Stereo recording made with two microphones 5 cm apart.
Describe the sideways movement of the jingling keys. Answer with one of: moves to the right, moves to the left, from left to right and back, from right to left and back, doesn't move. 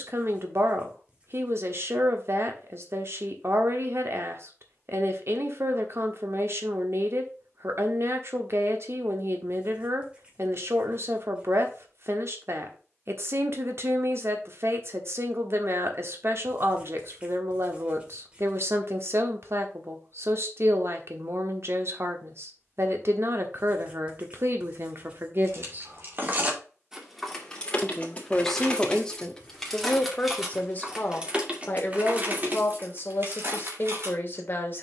from right to left and back.